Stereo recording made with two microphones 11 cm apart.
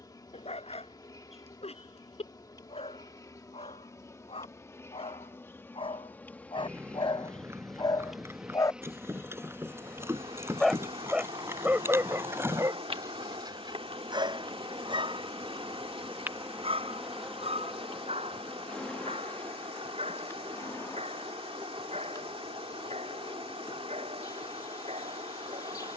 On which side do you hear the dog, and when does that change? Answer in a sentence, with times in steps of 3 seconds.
In this clip you hear the dog on the left from 0 s, in the centre from 9 s and on the right from 12 s.